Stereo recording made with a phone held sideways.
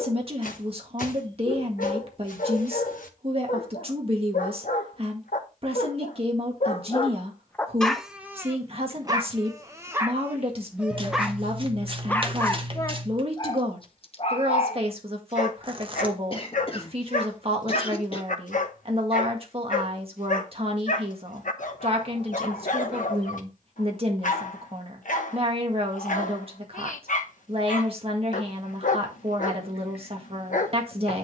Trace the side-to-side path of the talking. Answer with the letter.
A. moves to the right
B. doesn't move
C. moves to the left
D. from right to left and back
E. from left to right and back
B.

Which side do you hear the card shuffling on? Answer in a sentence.
You can hear the card shuffling on the right.